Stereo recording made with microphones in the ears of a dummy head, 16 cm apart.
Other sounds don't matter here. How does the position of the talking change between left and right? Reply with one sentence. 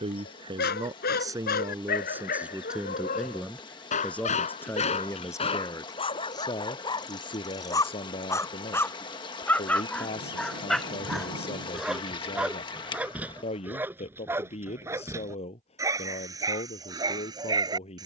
You can hear the talking move from right to left.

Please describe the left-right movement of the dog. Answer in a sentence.
In this clip you hear the dog move to the right.